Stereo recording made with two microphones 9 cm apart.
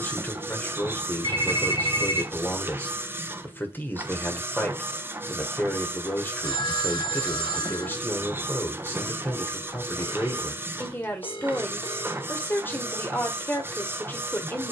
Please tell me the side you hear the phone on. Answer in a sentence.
In this clip you hear the phone on the left.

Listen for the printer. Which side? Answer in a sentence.
You can hear the printer on the right.